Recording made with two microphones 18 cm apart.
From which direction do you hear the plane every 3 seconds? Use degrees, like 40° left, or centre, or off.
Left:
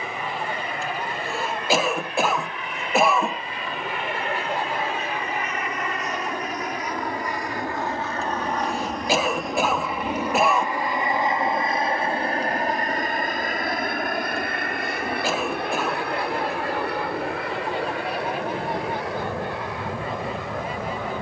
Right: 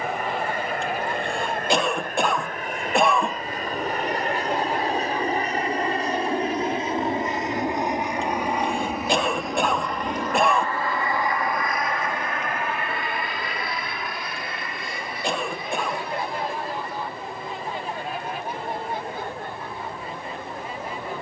50° right, 40° right, 20° right, 10° left, 40° left, 60° left, 70° left.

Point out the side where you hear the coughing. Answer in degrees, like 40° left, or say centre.
centre.